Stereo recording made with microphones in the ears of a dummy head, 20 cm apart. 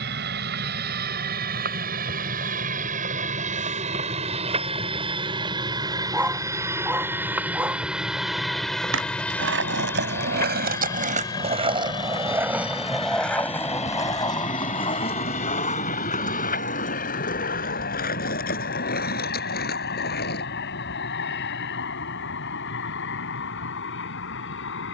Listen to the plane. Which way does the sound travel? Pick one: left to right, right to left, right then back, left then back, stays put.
right to left.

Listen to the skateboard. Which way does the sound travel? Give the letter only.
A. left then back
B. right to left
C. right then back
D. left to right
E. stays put
B.